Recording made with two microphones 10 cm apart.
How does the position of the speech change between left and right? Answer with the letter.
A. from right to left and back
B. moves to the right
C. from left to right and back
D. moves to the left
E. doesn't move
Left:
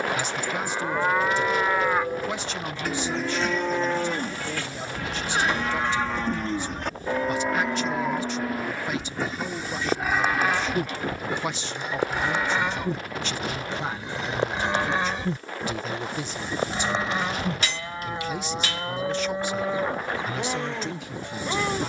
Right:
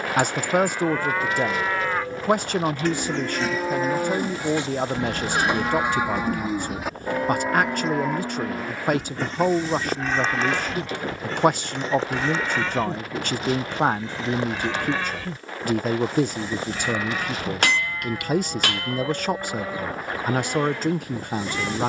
E.